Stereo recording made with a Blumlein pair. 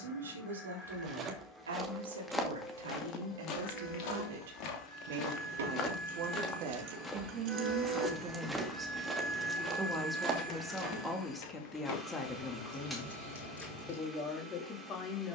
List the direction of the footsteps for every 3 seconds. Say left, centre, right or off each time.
centre, left, centre, right, off.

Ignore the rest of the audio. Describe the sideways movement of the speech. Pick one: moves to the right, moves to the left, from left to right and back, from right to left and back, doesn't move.
moves to the left.